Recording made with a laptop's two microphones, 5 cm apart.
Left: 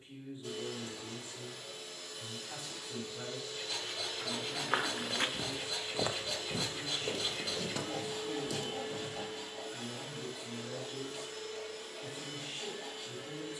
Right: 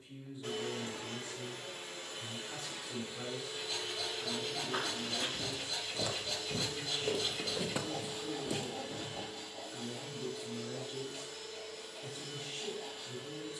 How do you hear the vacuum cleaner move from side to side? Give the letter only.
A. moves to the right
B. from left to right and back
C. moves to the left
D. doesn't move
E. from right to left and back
C.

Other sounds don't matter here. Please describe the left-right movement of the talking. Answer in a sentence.
You can hear the talking go right and come back.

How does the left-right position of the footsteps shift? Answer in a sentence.
You can hear the footsteps move to the right.